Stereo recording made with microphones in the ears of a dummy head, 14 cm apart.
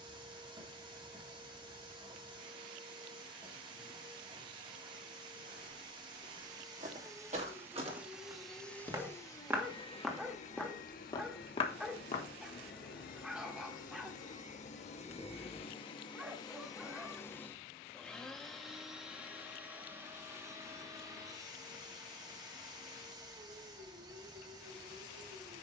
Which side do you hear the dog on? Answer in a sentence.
You can hear the dog in the centre.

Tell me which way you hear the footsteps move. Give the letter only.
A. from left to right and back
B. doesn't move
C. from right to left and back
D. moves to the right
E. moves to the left
E.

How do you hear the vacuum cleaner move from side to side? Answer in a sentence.
You can hear the vacuum cleaner go left and come back.